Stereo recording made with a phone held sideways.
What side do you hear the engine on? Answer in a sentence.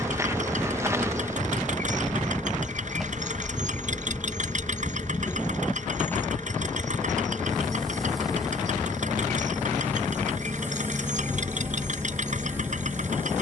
In this clip you hear the engine on the right.